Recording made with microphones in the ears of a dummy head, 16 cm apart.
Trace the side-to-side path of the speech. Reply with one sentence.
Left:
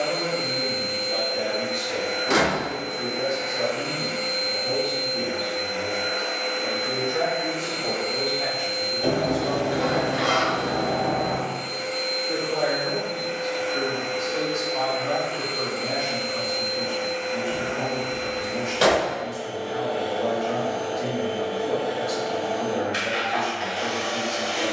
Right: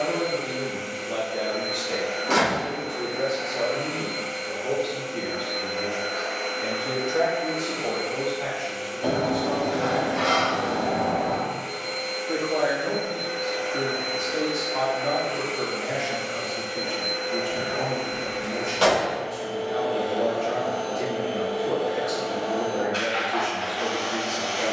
You can hear the speech move from right to left and back again.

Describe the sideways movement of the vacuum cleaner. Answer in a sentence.
You can hear the vacuum cleaner go right and come back.